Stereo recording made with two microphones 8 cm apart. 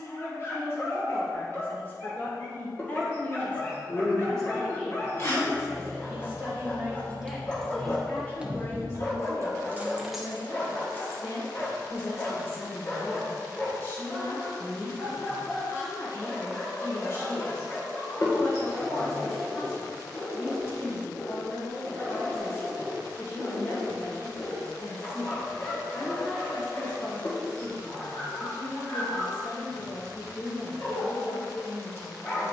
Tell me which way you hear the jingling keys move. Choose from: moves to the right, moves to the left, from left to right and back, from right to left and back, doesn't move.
from left to right and back.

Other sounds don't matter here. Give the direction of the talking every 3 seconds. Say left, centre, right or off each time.
left, centre, centre, left, left, left, left, left, left, left, left.